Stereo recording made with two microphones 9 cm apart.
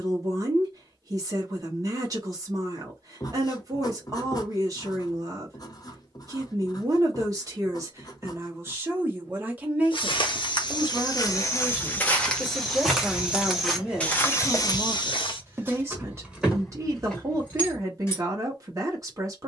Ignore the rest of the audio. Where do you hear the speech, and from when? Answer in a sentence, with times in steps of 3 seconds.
In this clip you hear the speech on the right from 0 s, in the centre from 9 s and on the right from 15 s.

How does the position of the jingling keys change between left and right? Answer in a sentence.
You can hear the jingling keys go right and come back.